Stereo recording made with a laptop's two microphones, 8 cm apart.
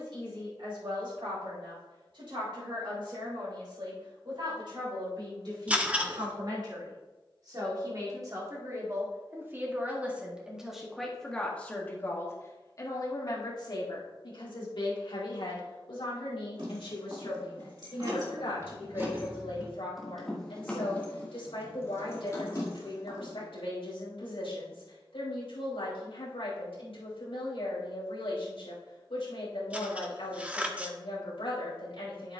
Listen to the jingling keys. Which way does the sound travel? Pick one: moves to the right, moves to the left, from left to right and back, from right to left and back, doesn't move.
moves to the left.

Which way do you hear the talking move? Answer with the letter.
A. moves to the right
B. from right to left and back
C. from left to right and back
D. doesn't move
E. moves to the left
E.